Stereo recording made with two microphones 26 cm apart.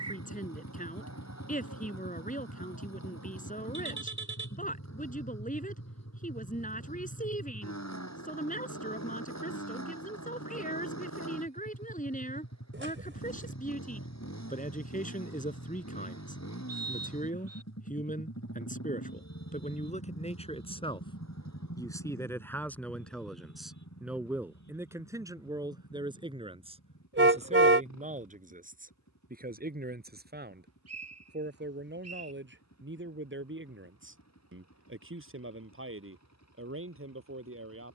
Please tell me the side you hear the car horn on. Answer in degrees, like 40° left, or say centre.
50° right.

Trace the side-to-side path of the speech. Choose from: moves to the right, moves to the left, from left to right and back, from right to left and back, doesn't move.
moves to the right.